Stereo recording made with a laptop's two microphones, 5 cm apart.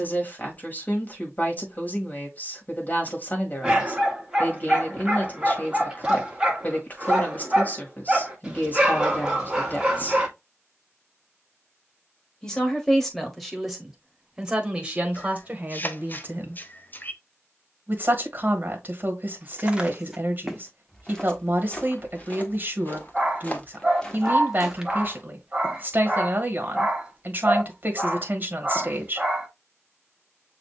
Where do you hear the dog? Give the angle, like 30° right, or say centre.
20° right.